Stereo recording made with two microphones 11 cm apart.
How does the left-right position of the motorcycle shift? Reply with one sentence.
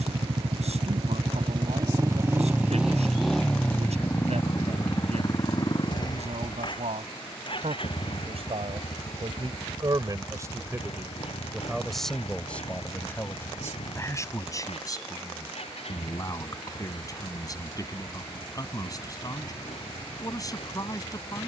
In this clip you hear the motorcycle go from the right side to the left.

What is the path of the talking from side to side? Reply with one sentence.
In this clip you hear the talking travel towards the left.